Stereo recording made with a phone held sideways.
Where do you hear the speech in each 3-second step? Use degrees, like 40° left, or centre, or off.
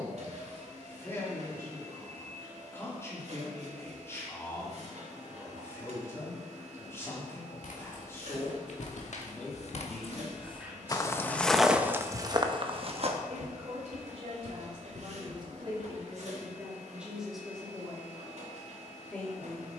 20° left, 20° left, 20° left, 10° right, 50° right, 20° right, 10° left.